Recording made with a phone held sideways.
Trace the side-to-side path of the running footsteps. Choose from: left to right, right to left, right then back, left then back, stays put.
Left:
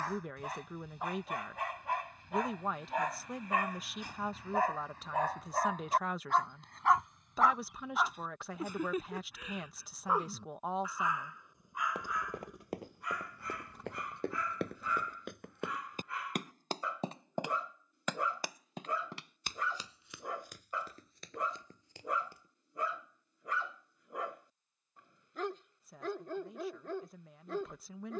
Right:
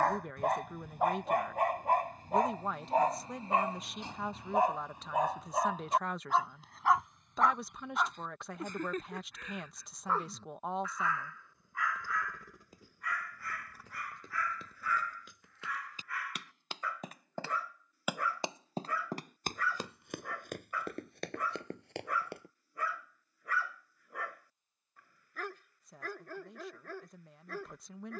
left to right.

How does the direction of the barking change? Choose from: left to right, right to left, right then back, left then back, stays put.
right to left.